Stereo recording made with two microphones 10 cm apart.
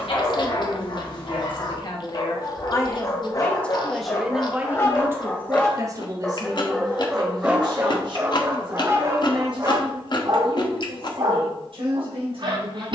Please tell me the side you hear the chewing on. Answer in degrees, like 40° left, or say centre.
50° left.